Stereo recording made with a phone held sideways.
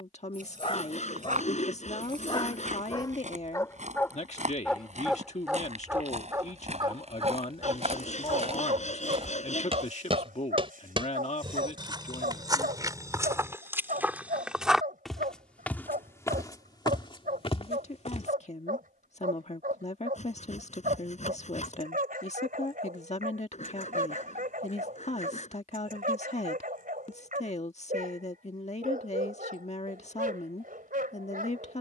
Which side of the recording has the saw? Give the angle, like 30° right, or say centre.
50° left.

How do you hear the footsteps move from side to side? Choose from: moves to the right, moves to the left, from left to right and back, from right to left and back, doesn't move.
moves to the left.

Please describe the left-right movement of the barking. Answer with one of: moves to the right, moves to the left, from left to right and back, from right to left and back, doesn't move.
moves to the right.